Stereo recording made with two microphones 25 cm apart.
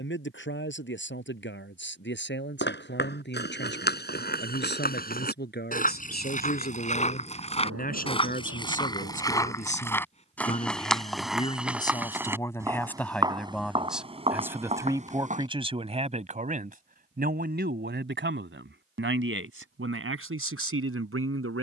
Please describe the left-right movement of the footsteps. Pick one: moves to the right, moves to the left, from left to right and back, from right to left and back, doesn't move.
moves to the right.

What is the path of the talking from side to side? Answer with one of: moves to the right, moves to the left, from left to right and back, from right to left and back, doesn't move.
moves to the right.